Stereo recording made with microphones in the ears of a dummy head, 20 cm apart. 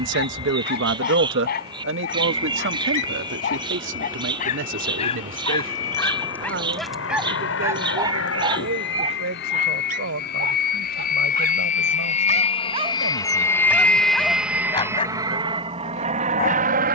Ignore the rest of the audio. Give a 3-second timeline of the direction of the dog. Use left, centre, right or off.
left, left, centre, right, centre, left.